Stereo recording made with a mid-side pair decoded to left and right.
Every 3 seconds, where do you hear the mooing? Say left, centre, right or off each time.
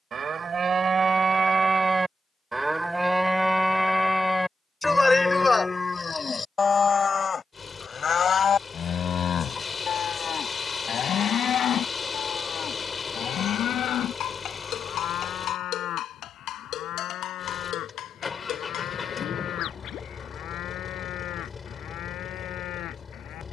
right, centre, left, left, left, left, left, left.